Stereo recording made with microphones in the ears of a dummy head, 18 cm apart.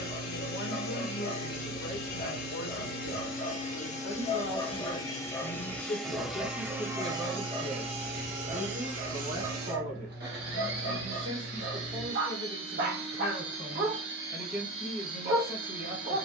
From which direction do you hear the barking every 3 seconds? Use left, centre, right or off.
left, left, right, right, right, right.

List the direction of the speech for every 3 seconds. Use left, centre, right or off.
left, left, centre, right, right, right.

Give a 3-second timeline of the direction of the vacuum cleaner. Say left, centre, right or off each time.
left, left, right, right, right, right.